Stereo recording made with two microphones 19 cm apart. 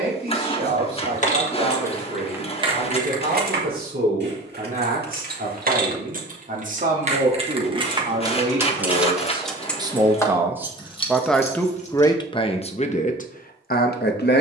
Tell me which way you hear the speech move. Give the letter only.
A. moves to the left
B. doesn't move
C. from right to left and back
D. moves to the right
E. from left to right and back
A.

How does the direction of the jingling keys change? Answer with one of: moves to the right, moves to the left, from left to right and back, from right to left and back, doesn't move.
from left to right and back.